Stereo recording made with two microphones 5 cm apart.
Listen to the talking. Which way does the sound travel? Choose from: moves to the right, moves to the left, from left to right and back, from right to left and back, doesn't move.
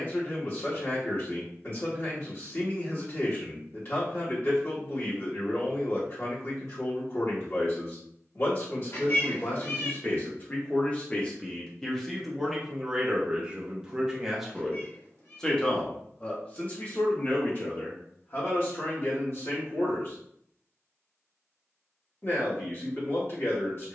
from left to right and back.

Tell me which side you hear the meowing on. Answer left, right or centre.
left.